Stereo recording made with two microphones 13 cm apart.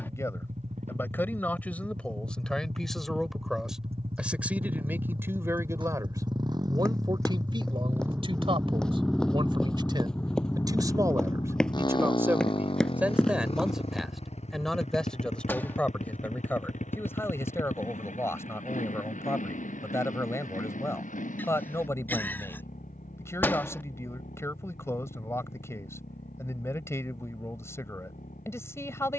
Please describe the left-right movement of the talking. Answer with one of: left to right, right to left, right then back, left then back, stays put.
right then back.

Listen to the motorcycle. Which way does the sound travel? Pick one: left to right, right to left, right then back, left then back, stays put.
right to left.